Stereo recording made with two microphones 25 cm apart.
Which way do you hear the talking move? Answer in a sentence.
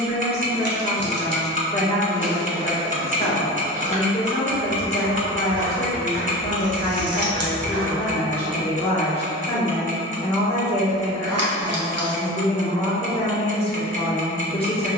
You can hear the talking stay put.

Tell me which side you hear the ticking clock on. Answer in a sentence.
In this clip you hear the ticking clock on the right.